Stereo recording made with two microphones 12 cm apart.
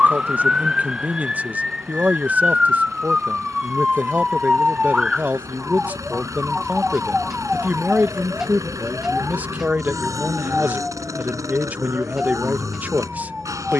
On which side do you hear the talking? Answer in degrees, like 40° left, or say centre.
10° right.